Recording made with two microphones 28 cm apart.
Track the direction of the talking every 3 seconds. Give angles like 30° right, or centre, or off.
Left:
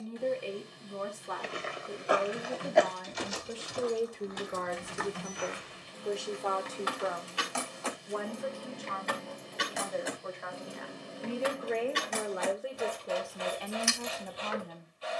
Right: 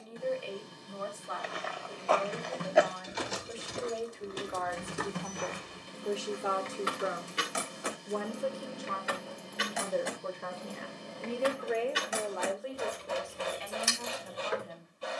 50° left, 30° left, 30° right, 30° right, 40° left.